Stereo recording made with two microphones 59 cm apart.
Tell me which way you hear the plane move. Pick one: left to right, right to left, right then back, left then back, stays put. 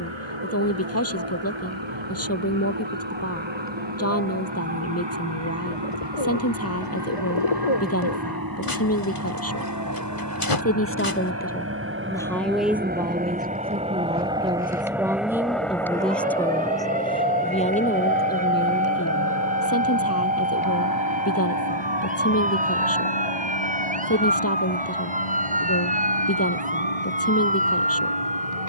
right to left.